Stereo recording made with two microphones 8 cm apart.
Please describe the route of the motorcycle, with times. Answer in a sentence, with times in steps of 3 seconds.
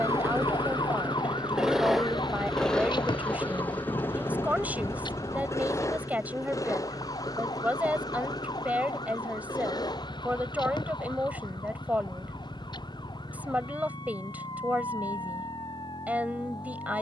In this clip you hear the motorcycle in the centre from 0 s and on the left from 3 s.